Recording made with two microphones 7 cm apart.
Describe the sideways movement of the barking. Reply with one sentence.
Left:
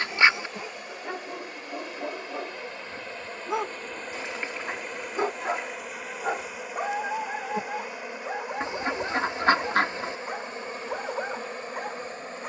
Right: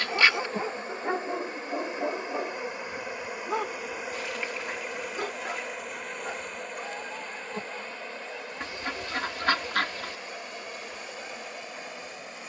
In this clip you hear the barking move from right to left.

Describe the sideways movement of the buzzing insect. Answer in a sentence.
You can hear the buzzing insect go from the right side to the left.